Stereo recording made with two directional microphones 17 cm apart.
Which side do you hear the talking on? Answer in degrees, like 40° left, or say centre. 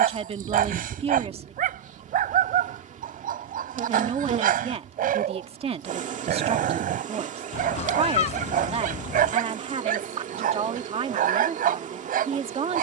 40° right.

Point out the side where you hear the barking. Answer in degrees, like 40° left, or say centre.
60° right.